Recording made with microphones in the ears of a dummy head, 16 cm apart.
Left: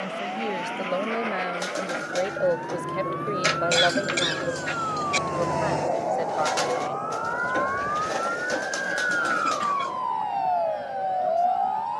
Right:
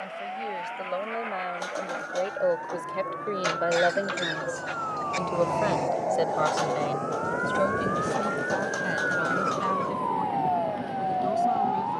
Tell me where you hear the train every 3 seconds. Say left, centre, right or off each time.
left, left, right, right.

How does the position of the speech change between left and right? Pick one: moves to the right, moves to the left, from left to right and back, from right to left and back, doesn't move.
moves to the right.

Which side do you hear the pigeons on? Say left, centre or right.
left.